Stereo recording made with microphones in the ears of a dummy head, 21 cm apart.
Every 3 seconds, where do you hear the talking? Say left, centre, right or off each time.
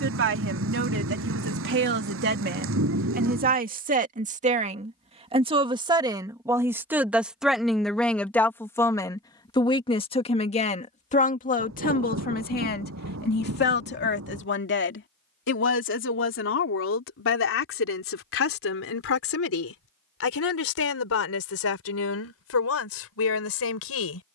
right, right, centre, left, left, left, left, left.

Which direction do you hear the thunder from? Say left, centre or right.
right.